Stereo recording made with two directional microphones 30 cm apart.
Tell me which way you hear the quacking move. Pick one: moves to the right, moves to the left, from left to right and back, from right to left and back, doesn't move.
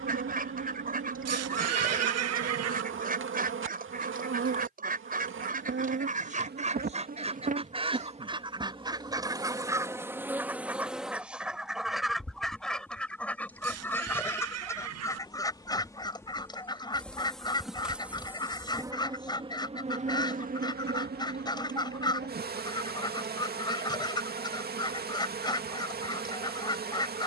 moves to the left.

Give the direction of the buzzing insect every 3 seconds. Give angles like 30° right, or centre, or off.
40° right, 40° right, 30° right, 10° right, 10° left, 10° left, 20° right, 30° right, 30° right.